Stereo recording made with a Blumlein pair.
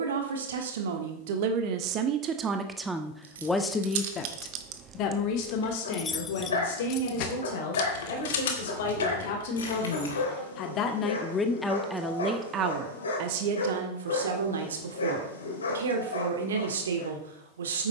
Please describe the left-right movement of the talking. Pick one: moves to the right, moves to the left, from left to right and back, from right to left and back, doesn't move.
from right to left and back.